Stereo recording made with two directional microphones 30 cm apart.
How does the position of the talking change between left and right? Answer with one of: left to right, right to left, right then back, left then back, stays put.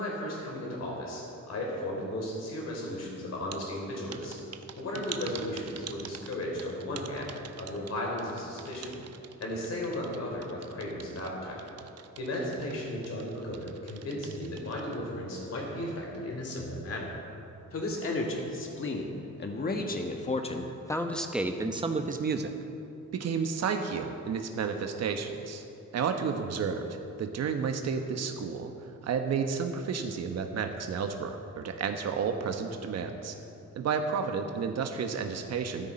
left to right.